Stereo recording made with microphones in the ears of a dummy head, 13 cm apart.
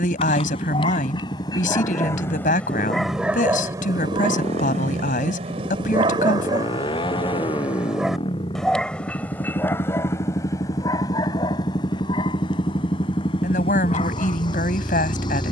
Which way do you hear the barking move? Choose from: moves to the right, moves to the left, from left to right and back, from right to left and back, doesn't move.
from left to right and back.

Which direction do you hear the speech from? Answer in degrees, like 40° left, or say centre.
60° left.